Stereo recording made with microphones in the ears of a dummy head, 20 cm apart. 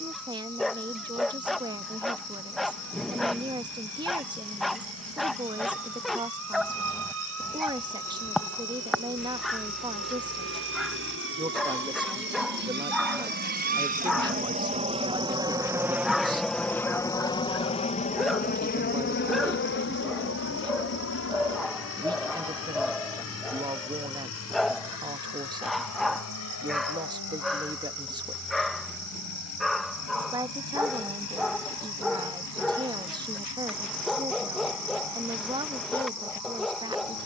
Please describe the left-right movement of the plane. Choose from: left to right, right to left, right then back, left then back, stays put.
right to left.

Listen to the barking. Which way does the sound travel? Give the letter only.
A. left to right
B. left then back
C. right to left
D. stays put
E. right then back
D.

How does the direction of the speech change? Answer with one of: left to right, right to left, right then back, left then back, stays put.
stays put.